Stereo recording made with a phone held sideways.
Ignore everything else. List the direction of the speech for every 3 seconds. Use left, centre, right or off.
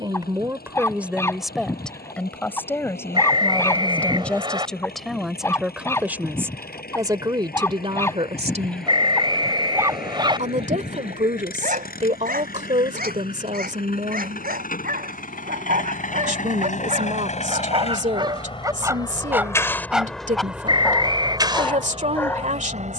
centre, centre, right, right, right, right, right, right.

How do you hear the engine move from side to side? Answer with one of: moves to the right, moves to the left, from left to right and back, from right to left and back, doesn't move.
moves to the right.